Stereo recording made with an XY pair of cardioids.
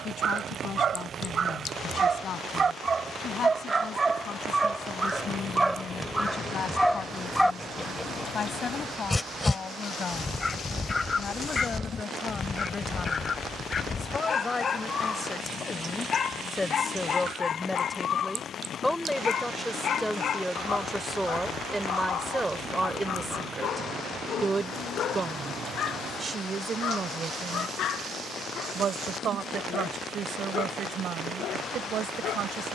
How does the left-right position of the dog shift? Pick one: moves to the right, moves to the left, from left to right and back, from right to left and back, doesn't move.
moves to the left.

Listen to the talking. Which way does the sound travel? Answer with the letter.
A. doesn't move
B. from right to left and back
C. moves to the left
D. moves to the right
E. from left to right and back
D.